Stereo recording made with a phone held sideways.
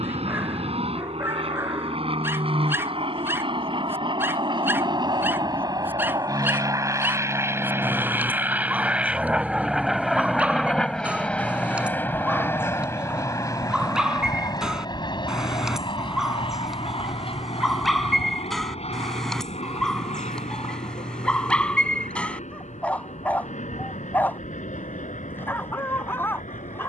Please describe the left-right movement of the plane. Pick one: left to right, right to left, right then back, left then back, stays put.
right to left.